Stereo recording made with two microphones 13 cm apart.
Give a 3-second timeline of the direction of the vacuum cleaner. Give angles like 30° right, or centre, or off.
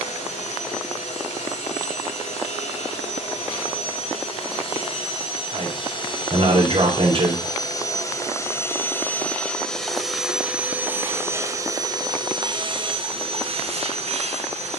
60° left, 50° left, 30° left, 10° right, 50° right.